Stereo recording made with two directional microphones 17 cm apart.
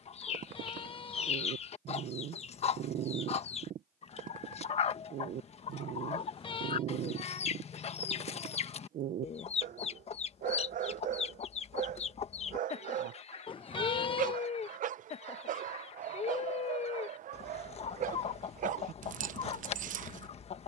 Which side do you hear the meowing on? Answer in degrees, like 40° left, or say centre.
30° left.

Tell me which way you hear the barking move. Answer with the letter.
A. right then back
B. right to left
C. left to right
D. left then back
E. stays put
E.